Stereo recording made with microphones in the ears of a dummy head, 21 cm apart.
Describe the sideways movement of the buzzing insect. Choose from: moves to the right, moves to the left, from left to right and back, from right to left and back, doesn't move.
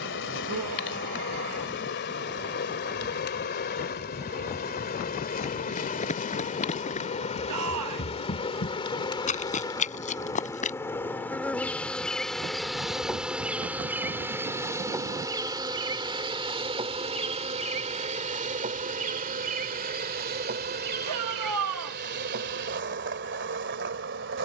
moves to the right.